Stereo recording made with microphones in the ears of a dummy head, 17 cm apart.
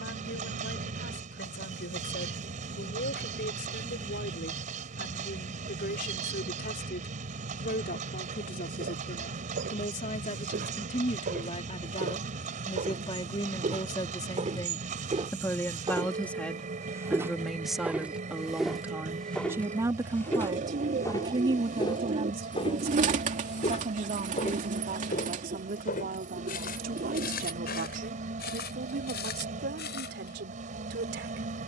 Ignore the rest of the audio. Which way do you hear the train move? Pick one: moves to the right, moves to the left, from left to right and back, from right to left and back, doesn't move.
doesn't move.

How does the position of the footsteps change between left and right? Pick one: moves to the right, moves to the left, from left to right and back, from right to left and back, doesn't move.
moves to the left.